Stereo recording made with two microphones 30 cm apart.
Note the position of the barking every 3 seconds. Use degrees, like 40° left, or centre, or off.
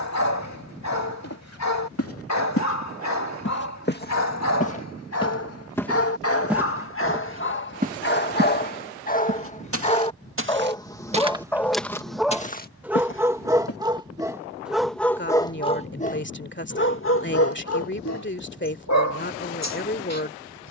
60° left, 60° left, 40° left, 10° left, 10° right, 30° left, 60° left.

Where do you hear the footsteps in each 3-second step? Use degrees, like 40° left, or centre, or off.
50° left, 30° left, 20° right, 30° right, 30° left, off, off.